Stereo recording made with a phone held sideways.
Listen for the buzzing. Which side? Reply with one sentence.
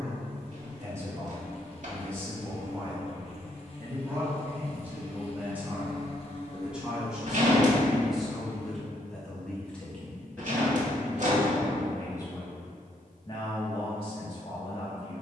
You can hear the buzzing on the left.